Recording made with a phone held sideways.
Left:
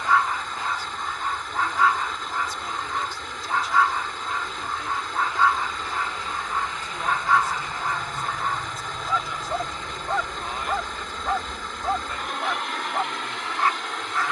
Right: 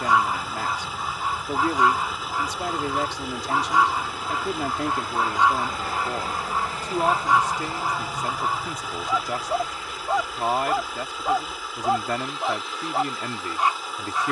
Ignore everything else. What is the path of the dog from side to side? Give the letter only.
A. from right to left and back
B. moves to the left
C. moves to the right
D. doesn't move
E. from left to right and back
D.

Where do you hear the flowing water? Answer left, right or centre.
centre.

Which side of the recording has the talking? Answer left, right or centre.
right.